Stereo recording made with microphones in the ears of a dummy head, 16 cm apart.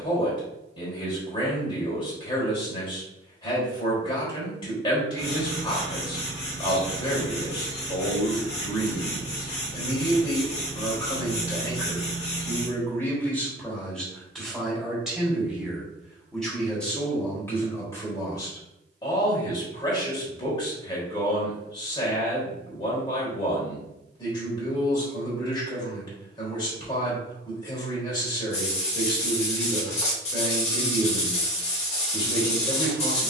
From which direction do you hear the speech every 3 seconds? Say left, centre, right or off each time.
left, left, left, left, centre, centre, left, left, left, left, left.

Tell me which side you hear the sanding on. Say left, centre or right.
left.